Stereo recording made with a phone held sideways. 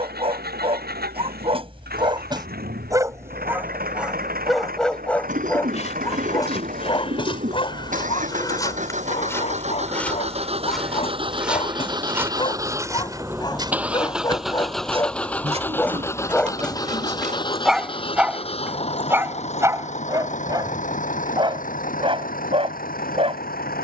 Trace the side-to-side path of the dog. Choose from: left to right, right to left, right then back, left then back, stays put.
left then back.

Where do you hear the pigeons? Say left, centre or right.
right.